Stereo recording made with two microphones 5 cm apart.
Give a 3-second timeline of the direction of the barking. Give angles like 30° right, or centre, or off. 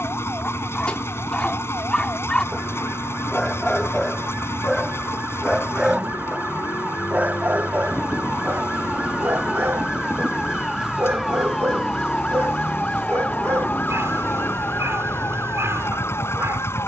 20° left, centre, 40° right, 60° right, 60° right, 60° right.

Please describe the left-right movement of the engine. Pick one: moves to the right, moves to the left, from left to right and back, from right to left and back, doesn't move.
doesn't move.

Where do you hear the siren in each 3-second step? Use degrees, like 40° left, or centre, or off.
50° right, 40° right, 30° right, 10° right, 30° left, 50° left.